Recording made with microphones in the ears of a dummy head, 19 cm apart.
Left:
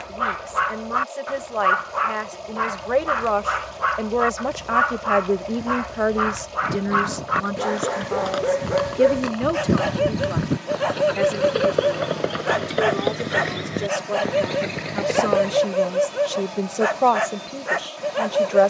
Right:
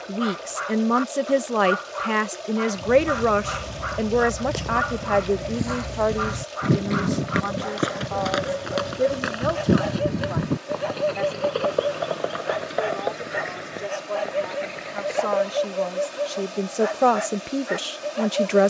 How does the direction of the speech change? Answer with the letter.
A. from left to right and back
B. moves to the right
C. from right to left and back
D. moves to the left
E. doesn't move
C.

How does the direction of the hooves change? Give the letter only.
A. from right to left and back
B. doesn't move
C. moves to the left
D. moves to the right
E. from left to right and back
C.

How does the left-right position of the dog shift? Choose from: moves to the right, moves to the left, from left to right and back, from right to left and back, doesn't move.
doesn't move.